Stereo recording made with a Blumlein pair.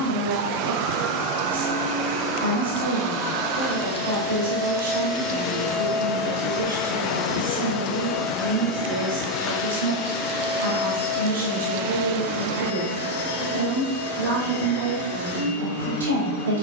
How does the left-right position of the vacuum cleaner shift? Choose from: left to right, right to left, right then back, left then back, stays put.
right to left.